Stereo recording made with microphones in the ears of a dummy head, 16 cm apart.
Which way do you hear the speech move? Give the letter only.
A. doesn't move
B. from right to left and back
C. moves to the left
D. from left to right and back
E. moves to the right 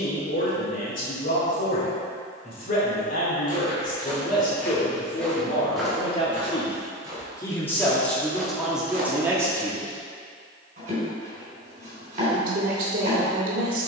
E.